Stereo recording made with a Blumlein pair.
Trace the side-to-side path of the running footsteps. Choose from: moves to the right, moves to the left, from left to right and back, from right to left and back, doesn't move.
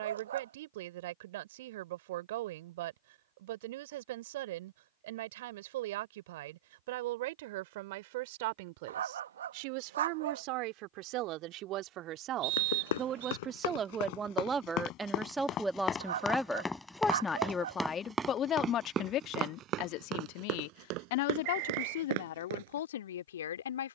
moves to the right.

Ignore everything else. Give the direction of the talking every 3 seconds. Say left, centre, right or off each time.
right, right, right, right, right, centre, left, left.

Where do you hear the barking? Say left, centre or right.
right.